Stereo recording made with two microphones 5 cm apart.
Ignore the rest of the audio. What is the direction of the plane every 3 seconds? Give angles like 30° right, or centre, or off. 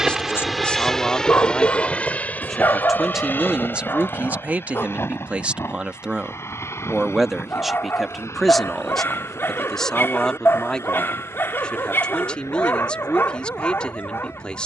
10° left, 40° left, 50° left, 60° left, 60° left.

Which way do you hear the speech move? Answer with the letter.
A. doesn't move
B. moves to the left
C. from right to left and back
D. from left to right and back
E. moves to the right
D.